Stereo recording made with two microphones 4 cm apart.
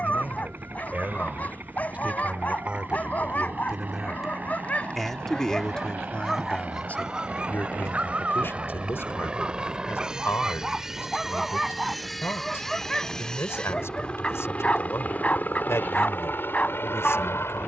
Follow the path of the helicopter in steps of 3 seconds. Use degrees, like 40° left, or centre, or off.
50° right, 40° right, 30° right, 10° right, 20° left, 50° left.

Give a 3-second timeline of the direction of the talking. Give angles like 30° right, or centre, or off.
30° right, centre, 40° left, 70° left, 70° left, 70° left.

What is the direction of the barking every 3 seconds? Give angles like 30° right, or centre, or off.
40° left, 30° left, 20° right, 10° right, 10° left, 30° left.